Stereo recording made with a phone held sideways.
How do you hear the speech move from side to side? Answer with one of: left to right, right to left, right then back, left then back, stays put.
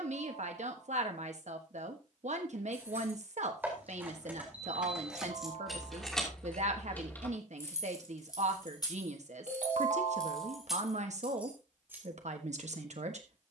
stays put.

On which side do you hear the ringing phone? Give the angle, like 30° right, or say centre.
70° right.